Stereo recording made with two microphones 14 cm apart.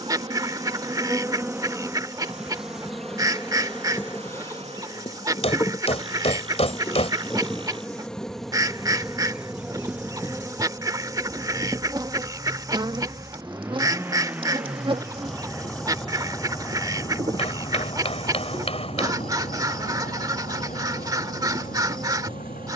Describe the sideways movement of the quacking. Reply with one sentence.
In this clip you hear the quacking stay put.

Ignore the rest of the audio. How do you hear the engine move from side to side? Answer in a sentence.
In this clip you hear the engine move from right to left.